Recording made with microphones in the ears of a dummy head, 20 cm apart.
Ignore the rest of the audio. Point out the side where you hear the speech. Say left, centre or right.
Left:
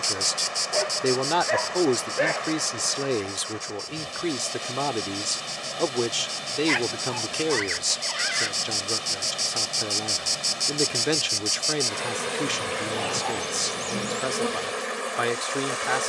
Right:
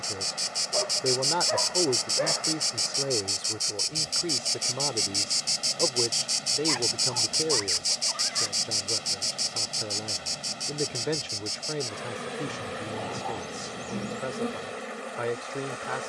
left.